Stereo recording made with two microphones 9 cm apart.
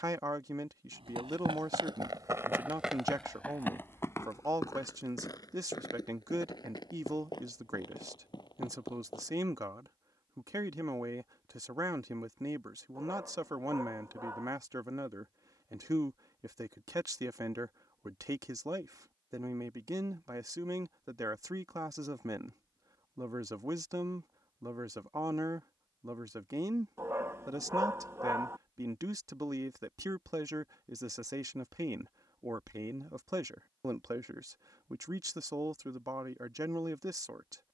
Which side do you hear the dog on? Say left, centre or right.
right.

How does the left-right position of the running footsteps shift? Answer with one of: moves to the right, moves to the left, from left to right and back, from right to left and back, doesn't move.
moves to the left.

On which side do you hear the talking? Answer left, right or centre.
right.